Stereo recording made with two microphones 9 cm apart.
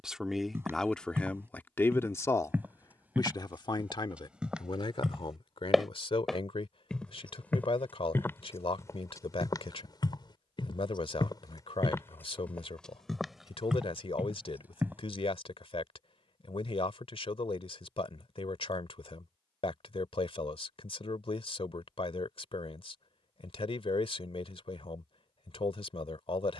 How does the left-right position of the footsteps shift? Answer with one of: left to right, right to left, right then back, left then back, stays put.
left then back.